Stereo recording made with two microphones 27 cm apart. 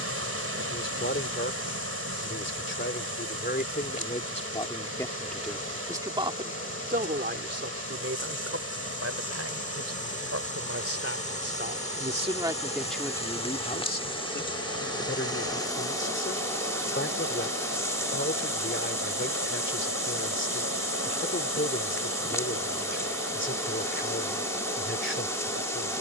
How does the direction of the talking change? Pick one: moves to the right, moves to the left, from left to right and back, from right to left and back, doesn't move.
from left to right and back.